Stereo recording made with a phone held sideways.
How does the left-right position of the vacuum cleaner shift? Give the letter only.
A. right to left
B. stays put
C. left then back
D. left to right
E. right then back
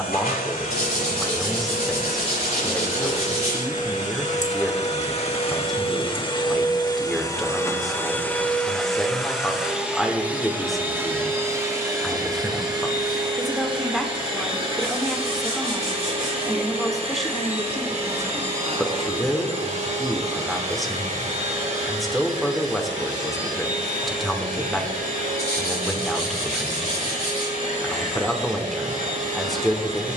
D.